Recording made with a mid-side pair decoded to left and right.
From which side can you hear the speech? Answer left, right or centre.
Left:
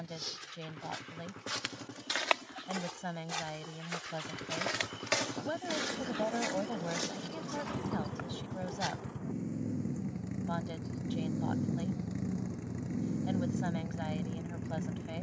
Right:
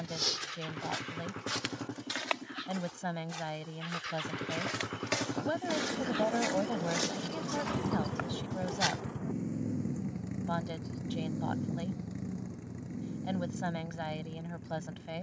right.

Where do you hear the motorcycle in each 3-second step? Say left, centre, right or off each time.
right, right, right, centre, left.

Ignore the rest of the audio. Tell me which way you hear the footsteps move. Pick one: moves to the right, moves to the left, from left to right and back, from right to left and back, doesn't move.
from right to left and back.